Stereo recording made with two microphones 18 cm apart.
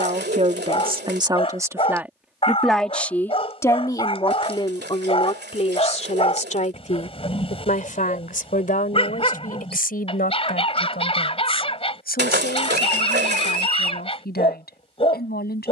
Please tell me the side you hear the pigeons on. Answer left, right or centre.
right.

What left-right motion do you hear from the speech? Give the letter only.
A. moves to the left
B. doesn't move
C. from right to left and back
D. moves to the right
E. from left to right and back
A.